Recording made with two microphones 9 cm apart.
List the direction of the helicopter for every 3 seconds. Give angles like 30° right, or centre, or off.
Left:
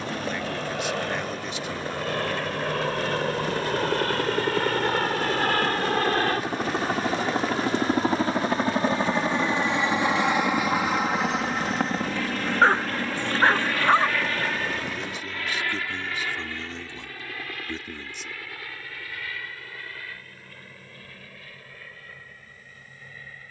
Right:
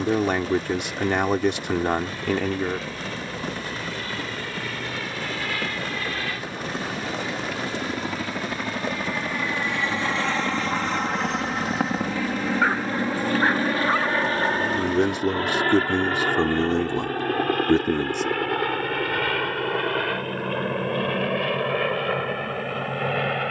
60° left, 50° left, 40° left, 10° left, 20° right, 50° right, 60° right, 70° right.